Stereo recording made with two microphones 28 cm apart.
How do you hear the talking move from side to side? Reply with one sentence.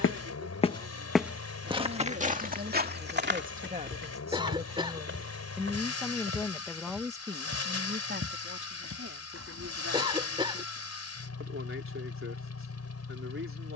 You can hear the talking go left and come back.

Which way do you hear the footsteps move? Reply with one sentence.
In this clip you hear the footsteps move from left to right.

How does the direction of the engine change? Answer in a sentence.
In this clip you hear the engine stay put.